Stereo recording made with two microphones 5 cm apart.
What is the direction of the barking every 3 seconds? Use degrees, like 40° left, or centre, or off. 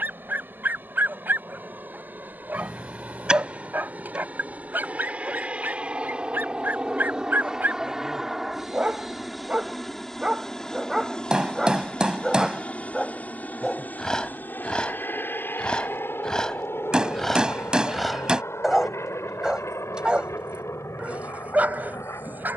40° right, 40° right, 30° right, 10° right, 10° left, 10° left, 10° right, 30° right.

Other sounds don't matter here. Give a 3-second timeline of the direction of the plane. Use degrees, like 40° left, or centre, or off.
40° right, 30° right, 10° right, 10° left, 30° left, 50° left, 60° left, 70° left.